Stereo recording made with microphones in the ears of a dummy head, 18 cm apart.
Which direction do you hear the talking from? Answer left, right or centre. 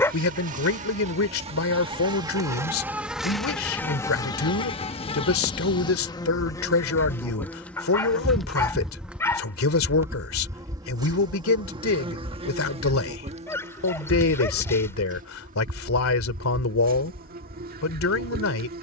left.